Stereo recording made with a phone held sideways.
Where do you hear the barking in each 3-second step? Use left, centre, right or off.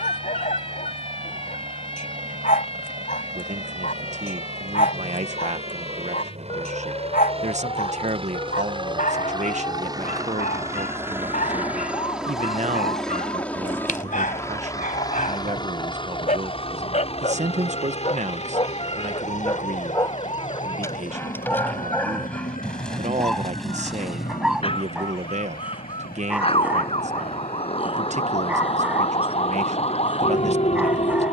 left, left, left, left, left, left, left, centre, centre, centre, centre.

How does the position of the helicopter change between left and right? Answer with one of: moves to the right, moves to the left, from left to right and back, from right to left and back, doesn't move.
moves to the left.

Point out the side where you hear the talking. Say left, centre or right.
right.